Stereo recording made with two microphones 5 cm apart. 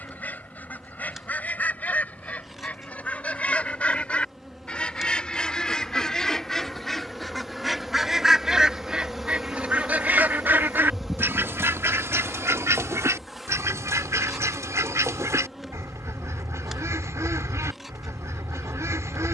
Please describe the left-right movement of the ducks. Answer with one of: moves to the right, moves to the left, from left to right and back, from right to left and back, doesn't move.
moves to the right.